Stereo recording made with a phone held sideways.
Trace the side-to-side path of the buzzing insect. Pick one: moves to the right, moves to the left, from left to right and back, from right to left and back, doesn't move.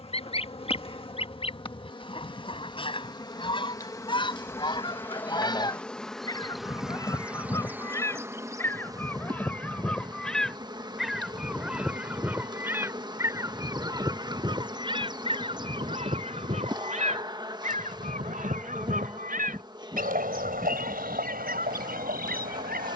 moves to the right.